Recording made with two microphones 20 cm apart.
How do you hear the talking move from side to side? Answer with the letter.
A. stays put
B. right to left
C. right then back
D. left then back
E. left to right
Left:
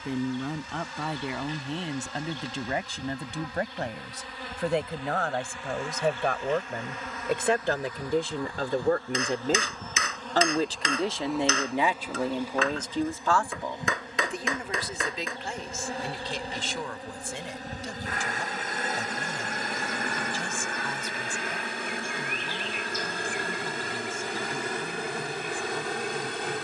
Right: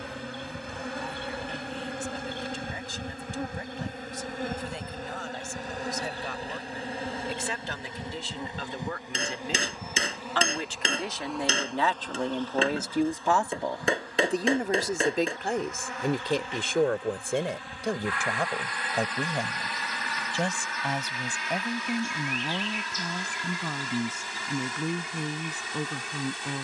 E.